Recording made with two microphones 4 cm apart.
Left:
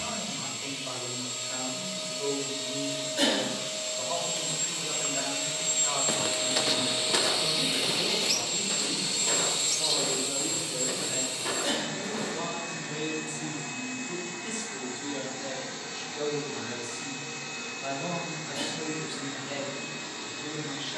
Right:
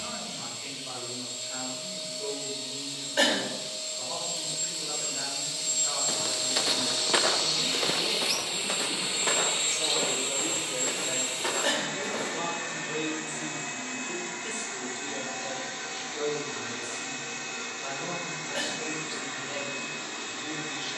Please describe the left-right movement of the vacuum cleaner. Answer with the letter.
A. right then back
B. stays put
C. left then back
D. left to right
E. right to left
D.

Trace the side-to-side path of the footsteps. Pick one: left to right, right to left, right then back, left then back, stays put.
left to right.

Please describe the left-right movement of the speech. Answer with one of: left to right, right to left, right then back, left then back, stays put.
right then back.